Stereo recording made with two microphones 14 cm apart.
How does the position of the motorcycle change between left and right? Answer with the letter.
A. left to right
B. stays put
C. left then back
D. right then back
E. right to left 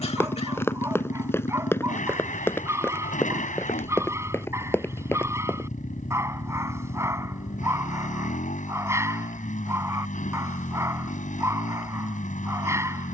B.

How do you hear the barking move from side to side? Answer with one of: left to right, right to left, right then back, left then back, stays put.
stays put.